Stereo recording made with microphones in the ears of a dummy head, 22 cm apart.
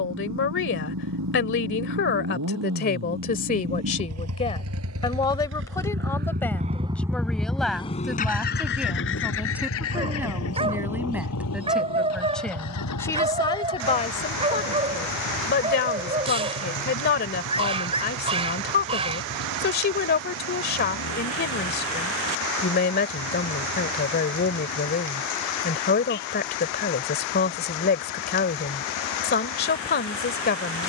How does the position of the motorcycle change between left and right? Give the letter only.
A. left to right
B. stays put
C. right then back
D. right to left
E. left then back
D.